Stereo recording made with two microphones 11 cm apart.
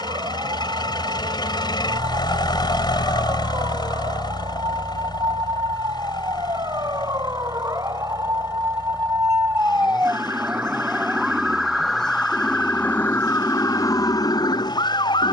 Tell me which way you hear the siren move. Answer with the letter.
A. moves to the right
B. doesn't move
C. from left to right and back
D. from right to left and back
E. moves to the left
E.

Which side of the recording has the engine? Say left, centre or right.
left.